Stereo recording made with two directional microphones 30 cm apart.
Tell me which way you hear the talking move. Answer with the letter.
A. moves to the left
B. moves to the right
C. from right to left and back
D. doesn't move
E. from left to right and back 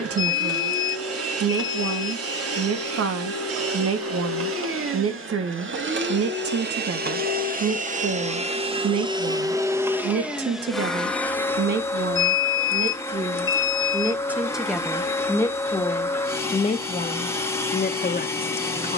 A.